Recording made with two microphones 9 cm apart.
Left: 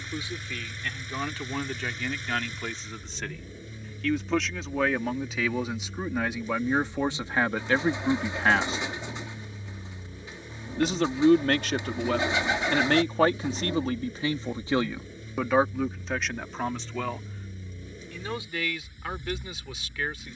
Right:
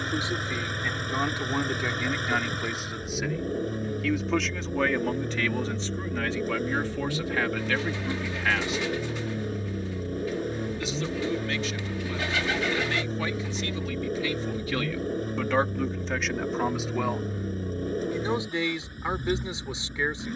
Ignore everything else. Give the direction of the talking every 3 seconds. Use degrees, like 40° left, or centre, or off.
20° right, centre, 30° left, 60° left, 50° left, centre, 20° right.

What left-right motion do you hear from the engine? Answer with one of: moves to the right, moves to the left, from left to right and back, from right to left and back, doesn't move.
doesn't move.